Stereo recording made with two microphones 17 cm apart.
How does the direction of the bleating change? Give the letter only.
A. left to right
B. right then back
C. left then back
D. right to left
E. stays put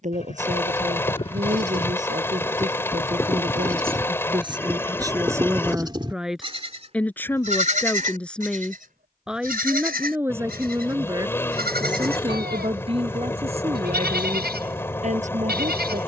A.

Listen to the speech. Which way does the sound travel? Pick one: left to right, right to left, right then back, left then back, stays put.
left then back.